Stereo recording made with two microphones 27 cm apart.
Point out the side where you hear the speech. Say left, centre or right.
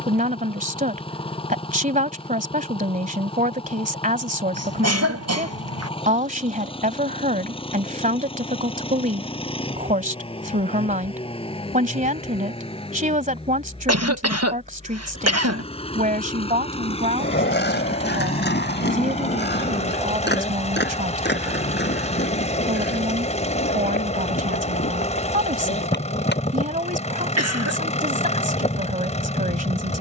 right.